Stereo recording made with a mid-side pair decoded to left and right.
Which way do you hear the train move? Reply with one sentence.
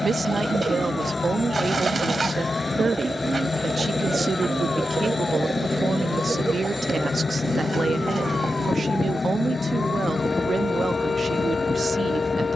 You can hear the train stay in one place.